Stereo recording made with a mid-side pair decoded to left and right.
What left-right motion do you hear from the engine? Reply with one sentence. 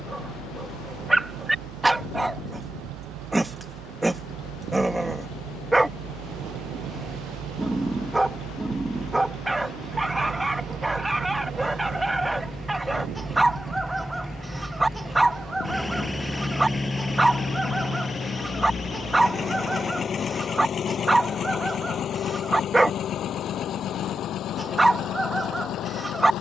You can hear the engine move from right to left.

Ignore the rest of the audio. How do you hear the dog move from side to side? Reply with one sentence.
You can hear the dog stay in one place.